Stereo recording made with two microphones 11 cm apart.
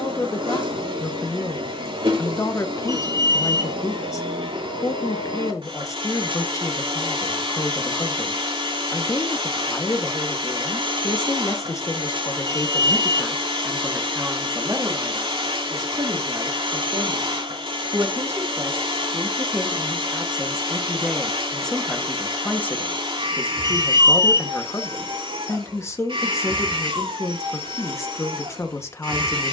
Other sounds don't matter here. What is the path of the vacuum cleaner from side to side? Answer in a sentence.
In this clip you hear the vacuum cleaner stay in one place.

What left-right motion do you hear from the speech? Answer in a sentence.
You can hear the speech move from left to right and back again.